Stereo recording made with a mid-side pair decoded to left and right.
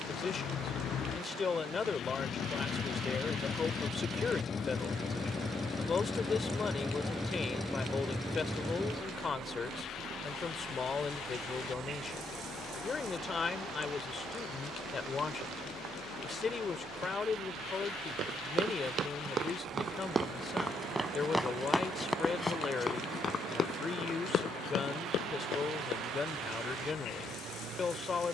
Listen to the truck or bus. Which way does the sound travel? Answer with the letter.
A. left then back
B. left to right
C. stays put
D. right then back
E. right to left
B.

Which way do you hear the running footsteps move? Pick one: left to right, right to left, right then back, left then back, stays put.
right to left.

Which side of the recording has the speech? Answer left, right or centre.
left.